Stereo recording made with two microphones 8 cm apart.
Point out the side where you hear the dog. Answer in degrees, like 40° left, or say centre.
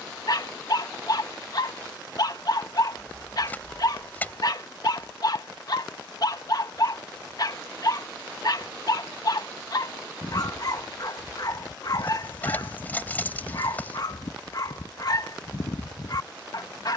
50° left.